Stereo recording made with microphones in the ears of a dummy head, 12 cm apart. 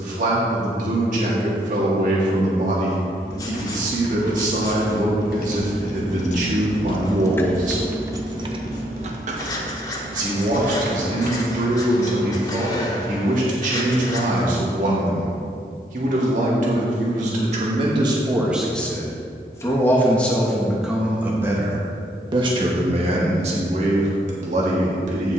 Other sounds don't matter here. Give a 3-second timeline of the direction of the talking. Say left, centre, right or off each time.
right, right, right, right, right, right, centre, right, right.